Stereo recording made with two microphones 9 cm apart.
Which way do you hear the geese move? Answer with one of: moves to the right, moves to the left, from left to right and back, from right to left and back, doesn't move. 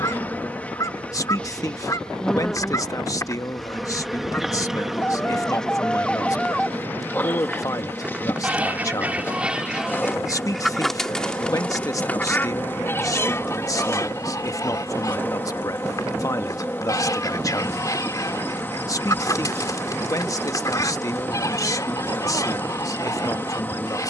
from left to right and back.